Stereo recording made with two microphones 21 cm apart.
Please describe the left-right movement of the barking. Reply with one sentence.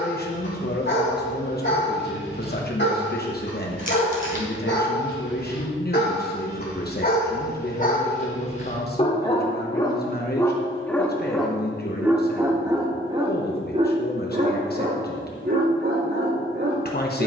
You can hear the barking travel towards the right.